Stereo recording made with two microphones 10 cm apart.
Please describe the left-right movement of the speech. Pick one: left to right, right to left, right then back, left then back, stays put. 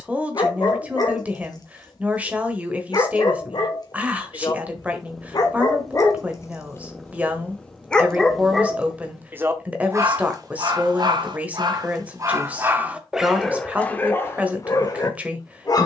stays put.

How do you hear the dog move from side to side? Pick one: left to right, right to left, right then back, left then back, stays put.
right then back.